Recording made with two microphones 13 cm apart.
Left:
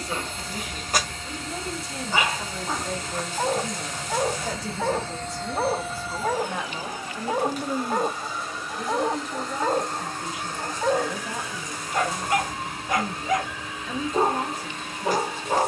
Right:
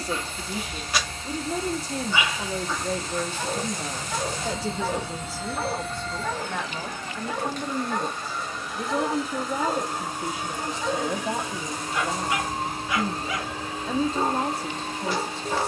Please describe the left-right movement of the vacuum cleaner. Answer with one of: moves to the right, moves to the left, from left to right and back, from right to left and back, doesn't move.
from right to left and back.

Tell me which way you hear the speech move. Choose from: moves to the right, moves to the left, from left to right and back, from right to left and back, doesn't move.
from right to left and back.